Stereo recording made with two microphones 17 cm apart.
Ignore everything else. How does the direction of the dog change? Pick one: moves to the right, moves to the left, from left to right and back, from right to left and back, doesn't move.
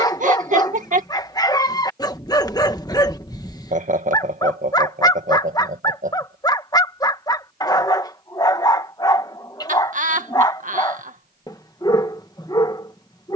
doesn't move.